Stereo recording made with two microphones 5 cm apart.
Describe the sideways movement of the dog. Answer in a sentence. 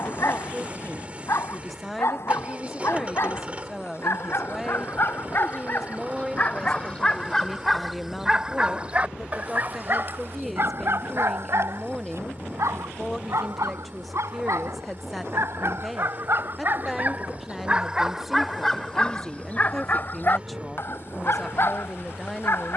You can hear the dog go right and come back.